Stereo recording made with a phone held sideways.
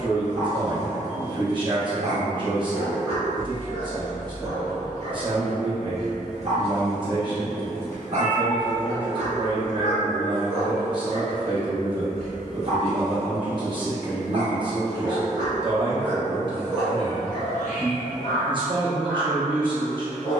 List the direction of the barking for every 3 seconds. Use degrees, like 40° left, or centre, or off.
50° right, 50° right, 50° right, 50° right, 50° right, 10° right, 20° left.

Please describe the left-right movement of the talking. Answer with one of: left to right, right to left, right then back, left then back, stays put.
stays put.